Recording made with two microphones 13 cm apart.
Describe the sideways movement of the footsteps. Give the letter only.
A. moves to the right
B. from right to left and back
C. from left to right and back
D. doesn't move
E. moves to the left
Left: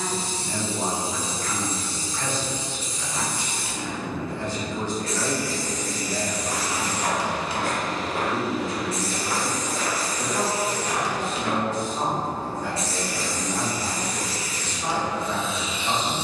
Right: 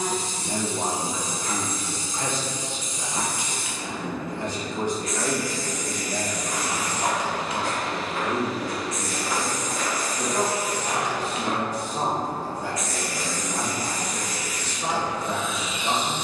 A.